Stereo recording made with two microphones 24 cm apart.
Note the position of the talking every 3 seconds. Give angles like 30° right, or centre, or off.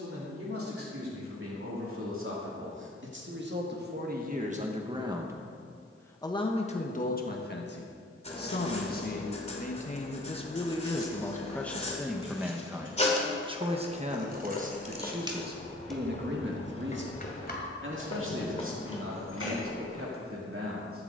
60° right, 40° right, 40° left, 20° left, 20° right, 50° right, 60° right.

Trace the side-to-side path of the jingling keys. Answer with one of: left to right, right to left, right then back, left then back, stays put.
right to left.